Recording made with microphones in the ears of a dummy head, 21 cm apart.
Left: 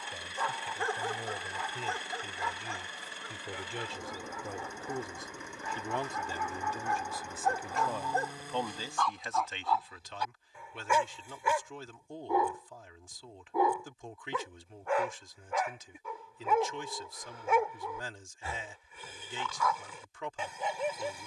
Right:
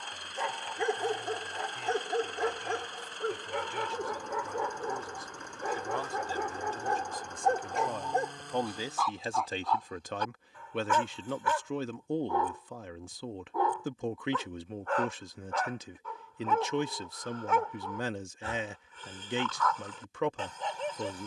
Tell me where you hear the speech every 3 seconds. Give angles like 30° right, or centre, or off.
40° left, 30° left, centre, 40° right, 50° right, 50° right, 50° right.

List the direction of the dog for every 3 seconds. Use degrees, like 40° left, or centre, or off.
30° right, 60° right, 30° right, 10° left, 10° left, 10° left, 10° left.